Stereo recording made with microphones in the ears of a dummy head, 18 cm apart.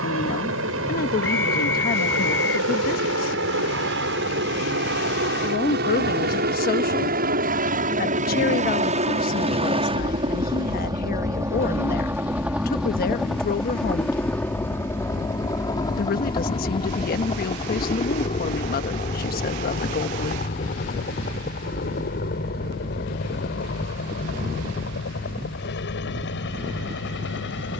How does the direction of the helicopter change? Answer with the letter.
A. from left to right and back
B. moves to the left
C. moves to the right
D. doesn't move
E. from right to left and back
B.